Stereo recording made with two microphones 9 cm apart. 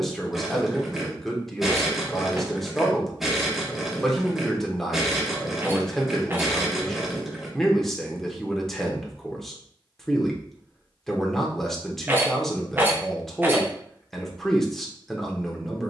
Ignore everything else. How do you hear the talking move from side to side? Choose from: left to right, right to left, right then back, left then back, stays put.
stays put.